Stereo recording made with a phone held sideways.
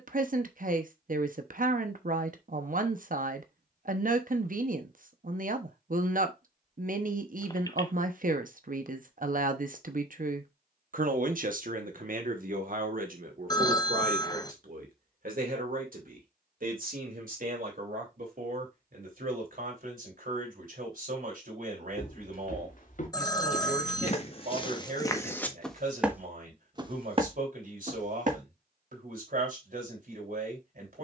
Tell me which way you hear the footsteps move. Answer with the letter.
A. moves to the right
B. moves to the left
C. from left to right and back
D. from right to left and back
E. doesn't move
A.